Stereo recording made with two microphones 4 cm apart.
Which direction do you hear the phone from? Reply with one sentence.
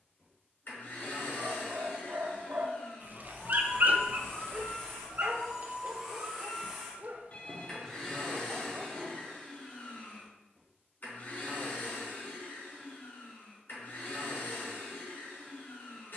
In this clip you hear the phone on the left.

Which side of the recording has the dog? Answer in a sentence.
In this clip you hear the dog on the right.